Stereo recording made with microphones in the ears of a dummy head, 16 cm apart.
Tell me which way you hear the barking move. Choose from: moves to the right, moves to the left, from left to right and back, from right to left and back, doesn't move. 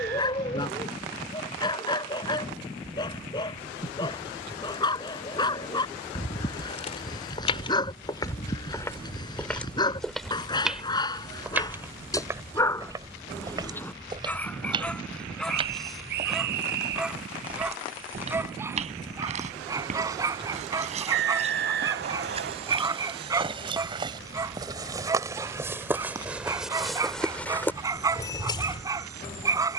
moves to the right.